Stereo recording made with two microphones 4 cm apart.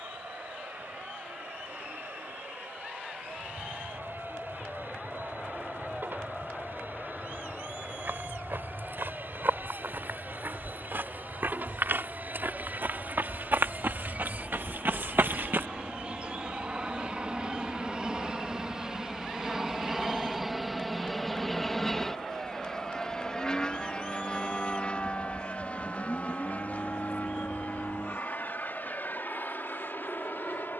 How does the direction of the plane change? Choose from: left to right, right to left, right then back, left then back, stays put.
right to left.